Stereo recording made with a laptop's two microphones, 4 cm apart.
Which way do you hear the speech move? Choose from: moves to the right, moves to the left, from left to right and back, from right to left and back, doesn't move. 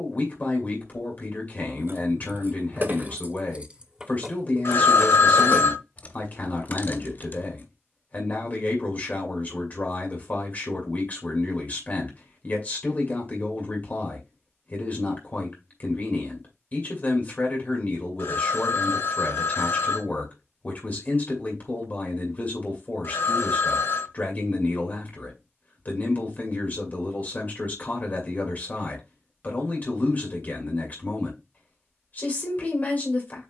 doesn't move.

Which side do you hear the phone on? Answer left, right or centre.
left.